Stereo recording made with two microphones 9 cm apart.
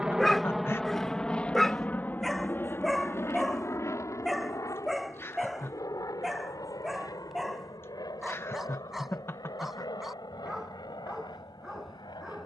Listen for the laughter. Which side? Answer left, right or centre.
left.